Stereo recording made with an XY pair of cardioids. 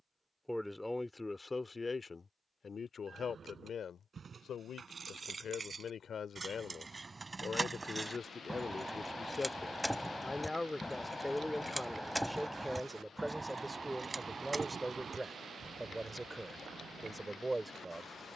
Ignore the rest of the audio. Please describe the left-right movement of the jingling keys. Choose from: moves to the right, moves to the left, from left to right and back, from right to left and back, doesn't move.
from right to left and back.